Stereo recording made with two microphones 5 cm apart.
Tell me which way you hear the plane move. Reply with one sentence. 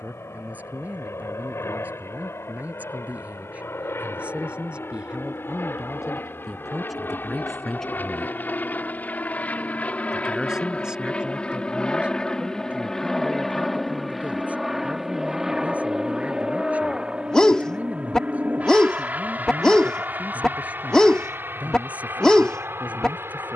In this clip you hear the plane move from left to right.